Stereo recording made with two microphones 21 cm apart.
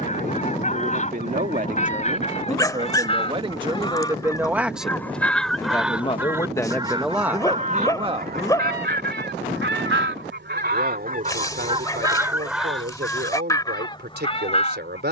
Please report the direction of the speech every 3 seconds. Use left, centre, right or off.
right, centre, centre, right, right.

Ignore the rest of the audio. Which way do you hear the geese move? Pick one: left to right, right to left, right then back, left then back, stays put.
right then back.